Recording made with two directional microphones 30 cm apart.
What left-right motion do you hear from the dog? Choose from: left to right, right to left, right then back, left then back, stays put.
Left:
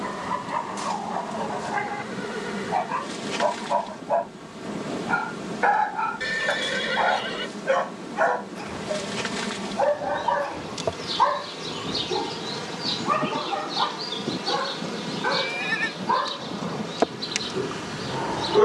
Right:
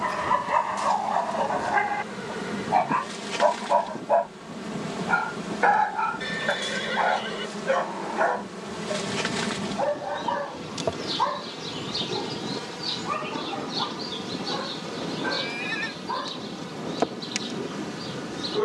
right to left.